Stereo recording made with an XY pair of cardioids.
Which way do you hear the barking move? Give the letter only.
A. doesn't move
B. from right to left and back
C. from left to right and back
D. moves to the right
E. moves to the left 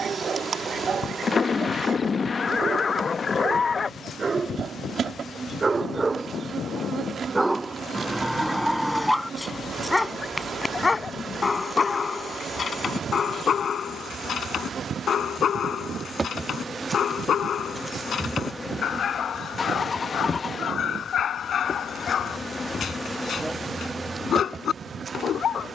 E.